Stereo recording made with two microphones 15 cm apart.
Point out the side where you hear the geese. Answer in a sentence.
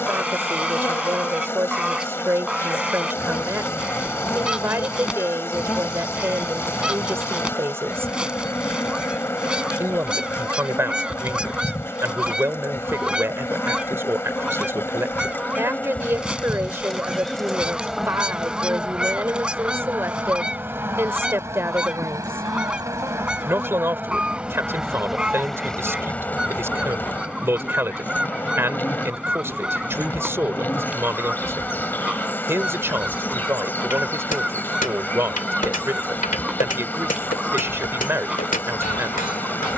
In this clip you hear the geese in the centre.